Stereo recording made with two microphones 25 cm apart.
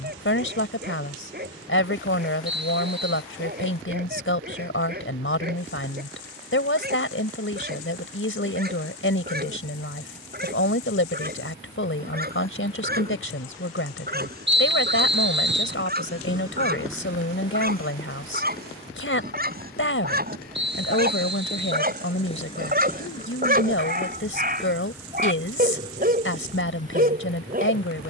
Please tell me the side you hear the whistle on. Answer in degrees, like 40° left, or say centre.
50° right.